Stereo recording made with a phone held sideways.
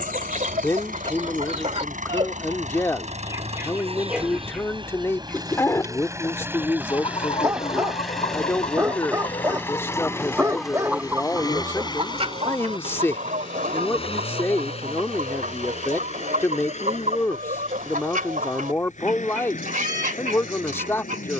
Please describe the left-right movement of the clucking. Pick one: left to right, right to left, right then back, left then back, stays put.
left then back.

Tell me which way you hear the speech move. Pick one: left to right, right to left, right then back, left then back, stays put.
stays put.